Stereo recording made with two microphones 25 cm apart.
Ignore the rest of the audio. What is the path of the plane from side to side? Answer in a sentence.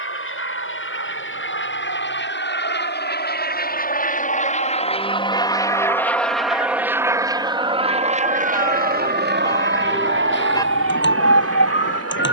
You can hear the plane go from the left side to the right.